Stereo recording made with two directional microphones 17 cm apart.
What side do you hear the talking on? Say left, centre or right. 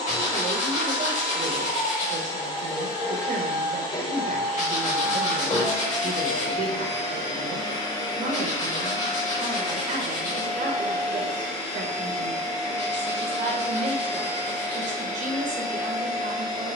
right.